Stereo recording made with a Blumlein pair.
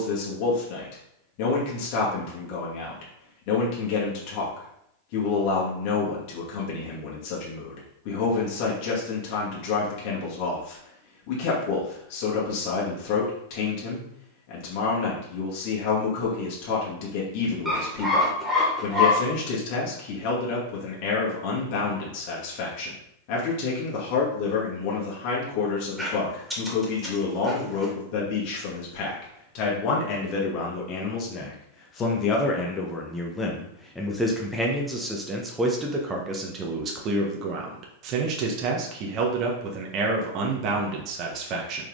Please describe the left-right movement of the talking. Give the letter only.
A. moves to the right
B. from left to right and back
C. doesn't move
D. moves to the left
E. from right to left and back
A.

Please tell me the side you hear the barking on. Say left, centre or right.
centre.